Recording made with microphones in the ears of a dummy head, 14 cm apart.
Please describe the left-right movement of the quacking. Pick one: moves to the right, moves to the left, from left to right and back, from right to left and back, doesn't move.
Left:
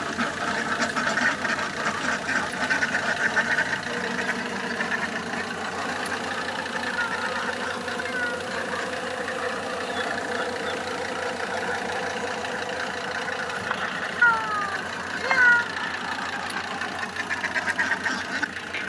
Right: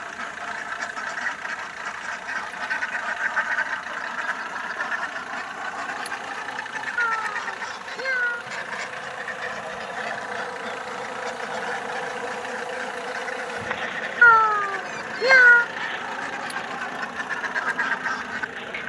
from left to right and back.